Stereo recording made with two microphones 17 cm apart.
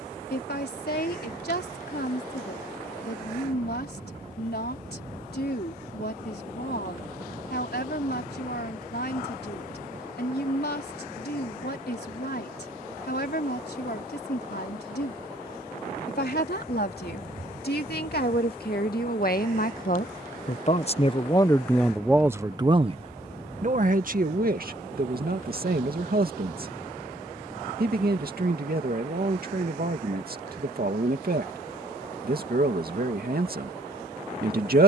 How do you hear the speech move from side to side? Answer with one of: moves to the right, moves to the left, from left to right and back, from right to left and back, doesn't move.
moves to the right.